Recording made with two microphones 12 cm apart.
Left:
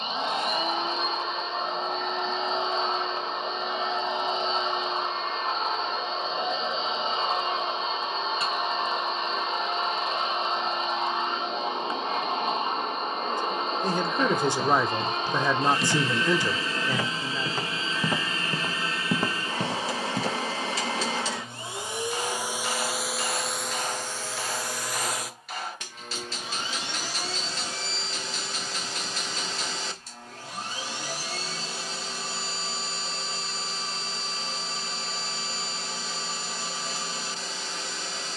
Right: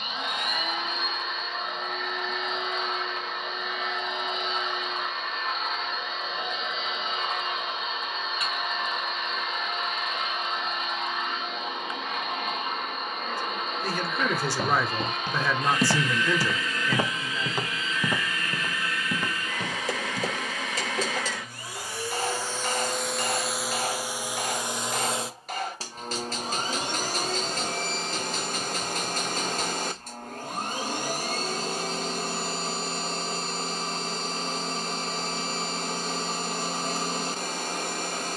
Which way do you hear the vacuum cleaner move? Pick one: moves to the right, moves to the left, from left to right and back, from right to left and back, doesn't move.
moves to the right.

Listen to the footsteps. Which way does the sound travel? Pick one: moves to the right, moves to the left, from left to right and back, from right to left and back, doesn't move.
moves to the left.